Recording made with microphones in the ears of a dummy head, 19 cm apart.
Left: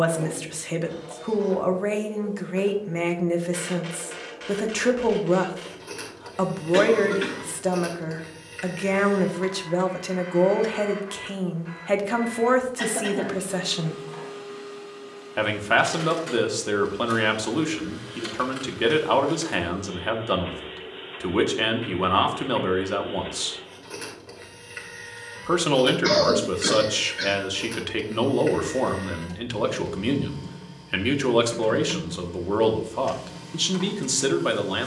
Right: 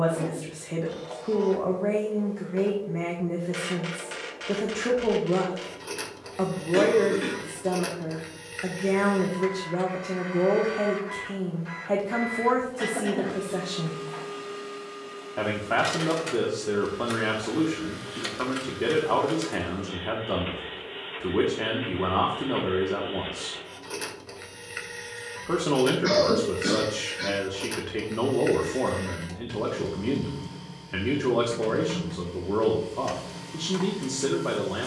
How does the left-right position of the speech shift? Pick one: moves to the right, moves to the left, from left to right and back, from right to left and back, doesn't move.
doesn't move.